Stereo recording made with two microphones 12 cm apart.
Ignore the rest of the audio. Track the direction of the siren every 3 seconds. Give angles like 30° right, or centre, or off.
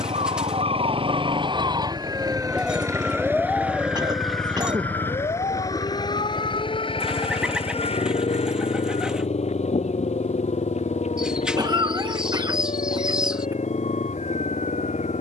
40° right, 30° left, 50° left, 60° left, 70° left.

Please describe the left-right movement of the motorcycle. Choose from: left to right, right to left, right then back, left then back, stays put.
right to left.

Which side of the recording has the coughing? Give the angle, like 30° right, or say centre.
30° right.